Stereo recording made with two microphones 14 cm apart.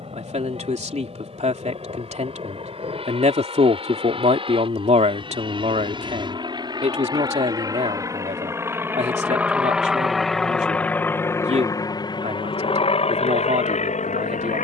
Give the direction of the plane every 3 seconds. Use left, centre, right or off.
right, right, right, centre, left.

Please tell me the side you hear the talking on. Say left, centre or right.
right.